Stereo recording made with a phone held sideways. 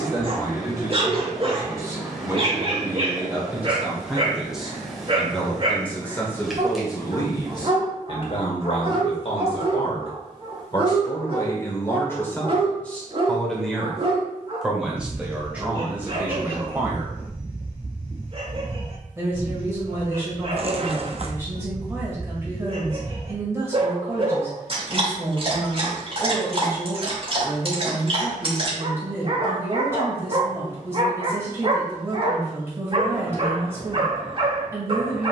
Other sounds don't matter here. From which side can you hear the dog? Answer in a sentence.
In this clip you hear the dog on the right.